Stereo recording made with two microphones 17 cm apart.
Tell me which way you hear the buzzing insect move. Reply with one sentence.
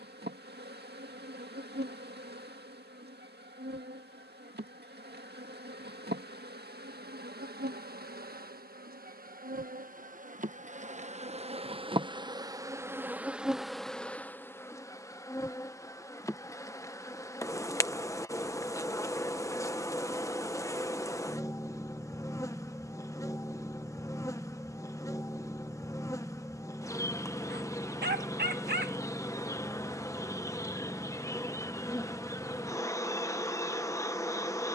In this clip you hear the buzzing insect travel towards the left.